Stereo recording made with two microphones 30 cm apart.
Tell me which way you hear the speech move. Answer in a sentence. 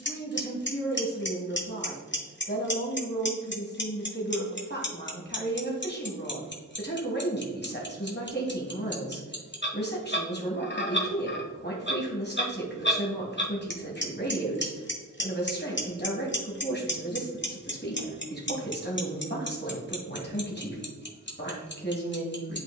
You can hear the speech stay in one place.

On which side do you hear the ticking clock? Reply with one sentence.
You can hear the ticking clock on the left.